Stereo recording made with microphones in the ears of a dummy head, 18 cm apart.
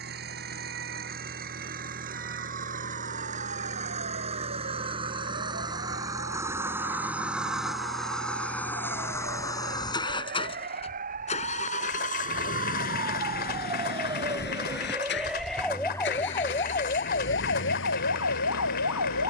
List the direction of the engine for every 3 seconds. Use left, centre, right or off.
right, right, centre, left, left, left, left.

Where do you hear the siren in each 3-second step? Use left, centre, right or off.
right, right, right, right, right, left, left.